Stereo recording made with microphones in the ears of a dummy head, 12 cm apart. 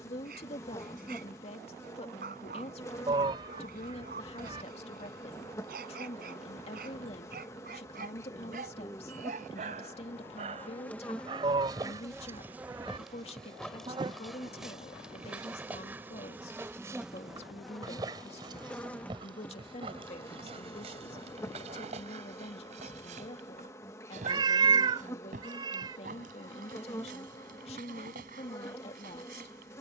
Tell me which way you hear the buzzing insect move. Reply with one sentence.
In this clip you hear the buzzing insect go right and come back.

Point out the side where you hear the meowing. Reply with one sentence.
In this clip you hear the meowing on the right.